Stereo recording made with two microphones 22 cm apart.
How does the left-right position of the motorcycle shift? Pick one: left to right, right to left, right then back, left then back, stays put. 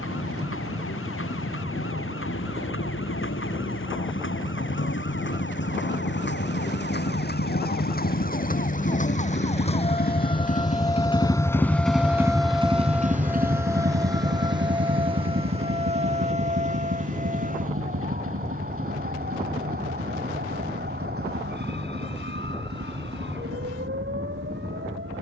left to right.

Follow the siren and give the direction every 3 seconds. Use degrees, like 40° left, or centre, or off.
70° left, 60° left, 50° left, 20° left, 10° right, 30° right, 50° right, 50° right, 60° right.